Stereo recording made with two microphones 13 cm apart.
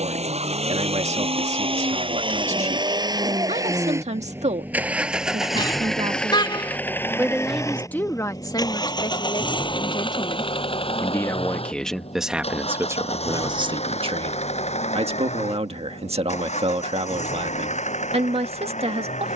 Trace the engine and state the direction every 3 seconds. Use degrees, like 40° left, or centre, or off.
50° right, 20° right, 20° left, 40° left, 50° left, 60° left, 60° left.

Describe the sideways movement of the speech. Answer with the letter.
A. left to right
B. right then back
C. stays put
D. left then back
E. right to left
D.